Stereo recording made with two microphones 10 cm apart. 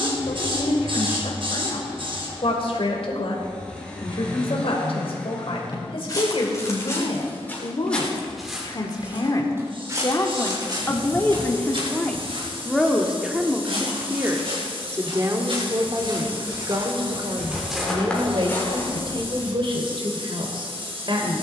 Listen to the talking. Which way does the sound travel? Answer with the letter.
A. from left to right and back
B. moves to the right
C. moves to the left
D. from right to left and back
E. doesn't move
B.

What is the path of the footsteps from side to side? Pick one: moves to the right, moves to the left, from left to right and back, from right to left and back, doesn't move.
from left to right and back.